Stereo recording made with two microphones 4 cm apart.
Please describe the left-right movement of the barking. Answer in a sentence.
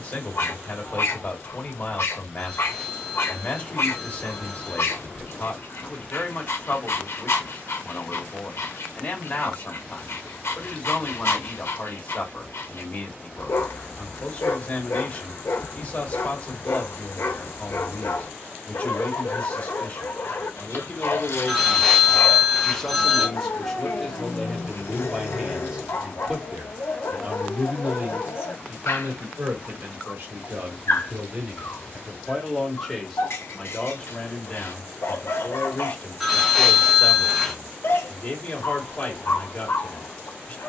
In this clip you hear the barking stay in one place.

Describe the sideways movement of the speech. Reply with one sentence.
In this clip you hear the speech move from left to right and back again.